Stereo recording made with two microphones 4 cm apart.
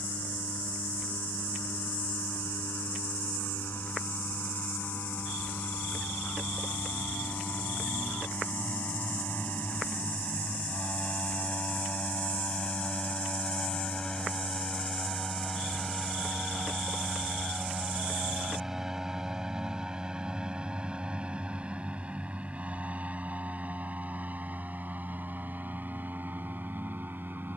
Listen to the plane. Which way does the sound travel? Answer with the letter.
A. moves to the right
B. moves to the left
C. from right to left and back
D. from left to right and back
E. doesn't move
A.